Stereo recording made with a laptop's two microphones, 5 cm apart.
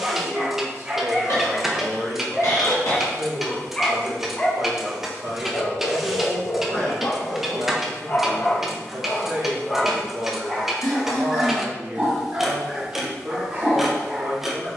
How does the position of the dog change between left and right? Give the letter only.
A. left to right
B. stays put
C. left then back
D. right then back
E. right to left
C.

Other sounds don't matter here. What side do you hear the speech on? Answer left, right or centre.
right.